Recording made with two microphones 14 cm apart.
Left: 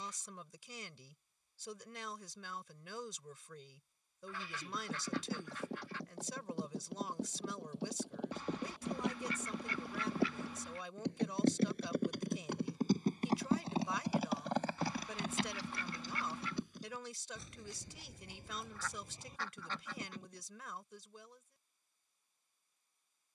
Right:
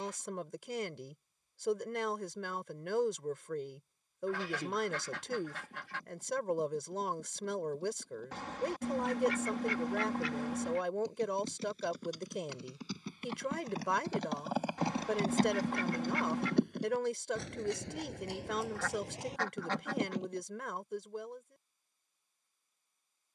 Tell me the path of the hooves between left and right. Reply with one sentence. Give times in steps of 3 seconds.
In this clip you hear the hooves not at all from 0 s, on the left from 3 s, on the right from 15 s and not at all from 21 s.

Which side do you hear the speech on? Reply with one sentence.
In this clip you hear the speech on the right.